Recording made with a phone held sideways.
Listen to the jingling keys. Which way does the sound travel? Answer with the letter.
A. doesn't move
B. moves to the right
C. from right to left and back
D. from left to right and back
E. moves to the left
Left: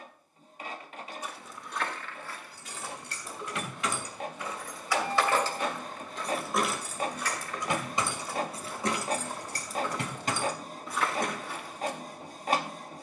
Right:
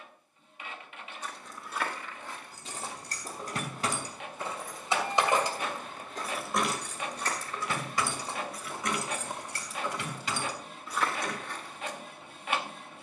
E.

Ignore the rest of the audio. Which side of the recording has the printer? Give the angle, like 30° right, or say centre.
40° left.